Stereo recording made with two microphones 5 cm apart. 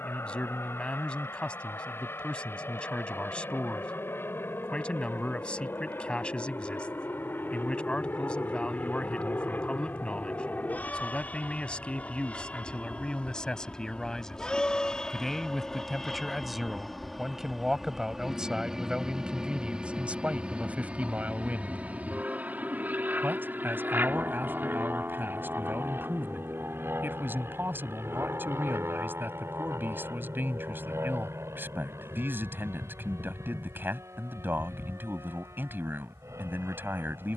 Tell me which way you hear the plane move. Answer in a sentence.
In this clip you hear the plane go from the left side to the right.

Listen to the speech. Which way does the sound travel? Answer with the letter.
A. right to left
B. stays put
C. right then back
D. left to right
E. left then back
D.